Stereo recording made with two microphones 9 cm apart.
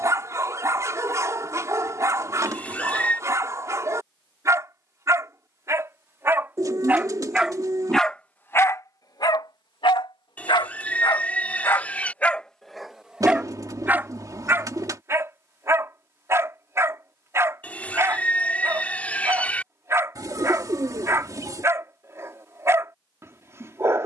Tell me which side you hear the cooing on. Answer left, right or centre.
right.